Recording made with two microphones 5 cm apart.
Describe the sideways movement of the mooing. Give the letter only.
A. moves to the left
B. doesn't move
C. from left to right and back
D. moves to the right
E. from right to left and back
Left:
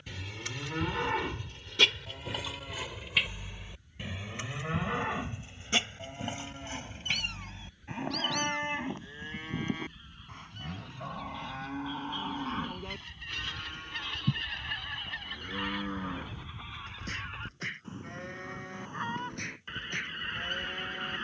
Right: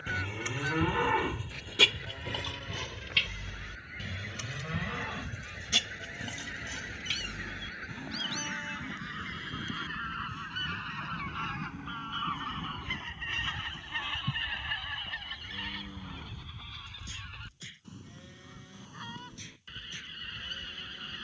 A.